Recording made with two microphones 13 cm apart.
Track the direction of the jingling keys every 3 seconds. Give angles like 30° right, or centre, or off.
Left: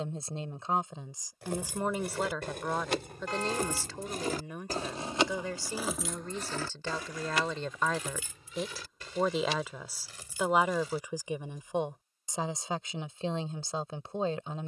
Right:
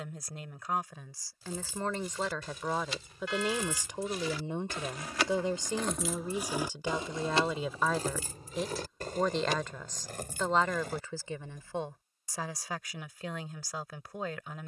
70° left, 40° left, 30° right, 60° right, off.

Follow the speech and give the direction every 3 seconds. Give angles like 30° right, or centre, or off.
20° left, 20° right, 10° right, 10° left, 30° left.